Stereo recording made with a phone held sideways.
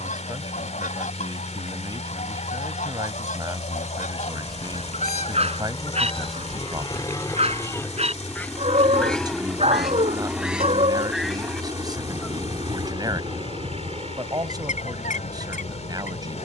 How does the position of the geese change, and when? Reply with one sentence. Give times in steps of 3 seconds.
In this clip you hear the geese on the left from 0 s, in the centre from 9 s and on the left from 12 s.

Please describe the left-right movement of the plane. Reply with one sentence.
You can hear the plane go from the left side to the right.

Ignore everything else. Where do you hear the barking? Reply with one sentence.
In this clip you hear the barking on the right.